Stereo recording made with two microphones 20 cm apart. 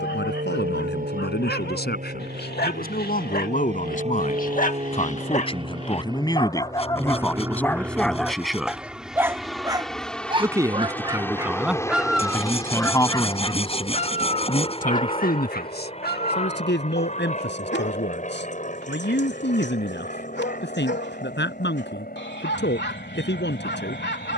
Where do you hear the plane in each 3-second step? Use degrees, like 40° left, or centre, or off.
50° right, 30° right, 10° right, 10° left, 20° left, 30° left, 40° left, 50° left.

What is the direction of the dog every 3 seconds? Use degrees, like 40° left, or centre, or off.
60° left, 40° left, 10° left, 20° right, 20° left, 60° left, 70° left, 70° left.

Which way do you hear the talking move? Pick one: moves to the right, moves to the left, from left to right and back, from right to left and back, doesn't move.
from left to right and back.